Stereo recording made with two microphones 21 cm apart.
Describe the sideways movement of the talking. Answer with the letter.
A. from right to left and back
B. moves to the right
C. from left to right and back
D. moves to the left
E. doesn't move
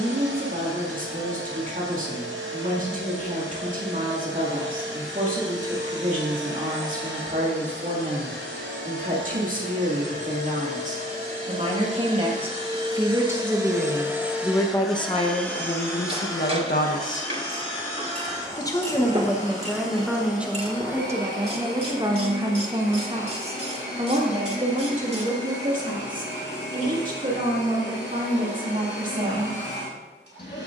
A.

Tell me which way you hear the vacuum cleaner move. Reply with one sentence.
In this clip you hear the vacuum cleaner travel towards the left.